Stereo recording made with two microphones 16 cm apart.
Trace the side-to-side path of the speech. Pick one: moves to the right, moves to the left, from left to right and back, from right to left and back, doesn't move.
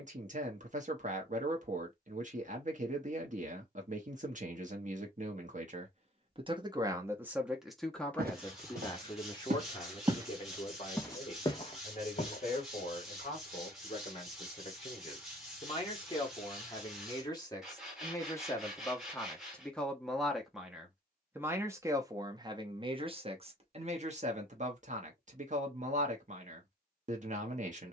from right to left and back.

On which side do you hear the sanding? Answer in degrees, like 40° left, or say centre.
centre.